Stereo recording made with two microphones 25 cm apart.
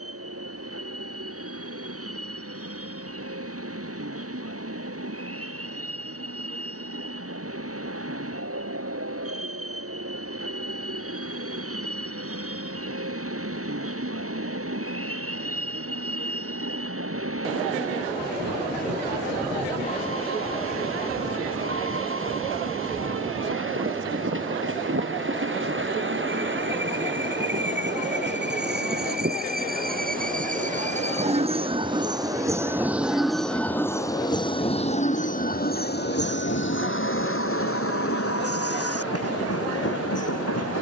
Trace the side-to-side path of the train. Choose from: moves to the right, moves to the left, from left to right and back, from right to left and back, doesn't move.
moves to the left.